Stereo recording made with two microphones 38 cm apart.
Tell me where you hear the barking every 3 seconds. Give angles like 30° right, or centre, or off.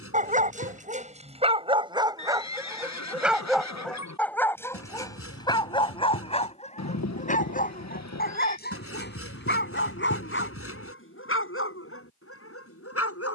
10° right, 10° left, 20° left, 30° left, 40° left.